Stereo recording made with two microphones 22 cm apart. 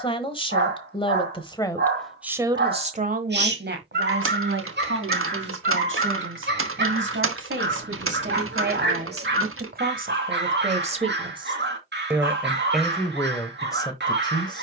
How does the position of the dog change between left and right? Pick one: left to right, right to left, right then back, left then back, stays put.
stays put.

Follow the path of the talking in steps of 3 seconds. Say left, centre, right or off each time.
centre, right, right, right, centre.